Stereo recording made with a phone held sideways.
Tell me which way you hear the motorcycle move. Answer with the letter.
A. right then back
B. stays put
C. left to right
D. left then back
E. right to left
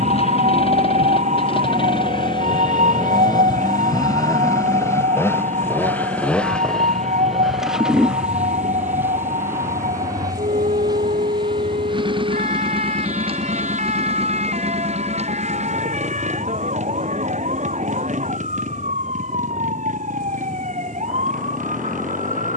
C.